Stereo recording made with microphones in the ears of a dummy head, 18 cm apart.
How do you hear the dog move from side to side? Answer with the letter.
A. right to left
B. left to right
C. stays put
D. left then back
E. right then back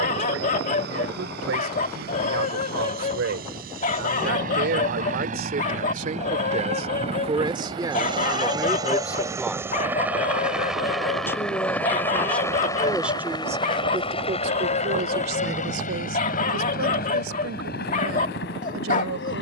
C.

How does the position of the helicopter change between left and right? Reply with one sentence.
In this clip you hear the helicopter move from right to left.